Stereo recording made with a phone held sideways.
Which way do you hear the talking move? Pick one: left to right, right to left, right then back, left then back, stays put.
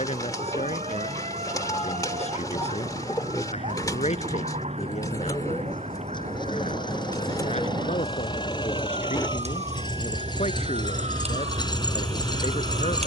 stays put.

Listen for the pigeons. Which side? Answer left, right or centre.
left.